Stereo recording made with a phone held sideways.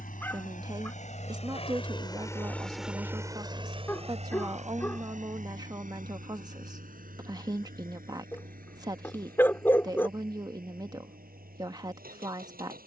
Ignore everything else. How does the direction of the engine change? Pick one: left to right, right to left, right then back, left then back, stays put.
left to right.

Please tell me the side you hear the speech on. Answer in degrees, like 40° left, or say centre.
30° right.